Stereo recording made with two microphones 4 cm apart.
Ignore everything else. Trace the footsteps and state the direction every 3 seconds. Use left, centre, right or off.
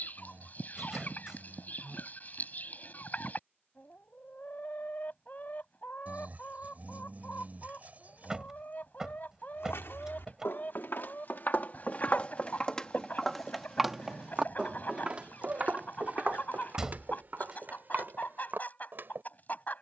off, off, off, left, centre, right, right.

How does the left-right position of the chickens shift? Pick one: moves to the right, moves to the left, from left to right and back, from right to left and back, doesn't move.
doesn't move.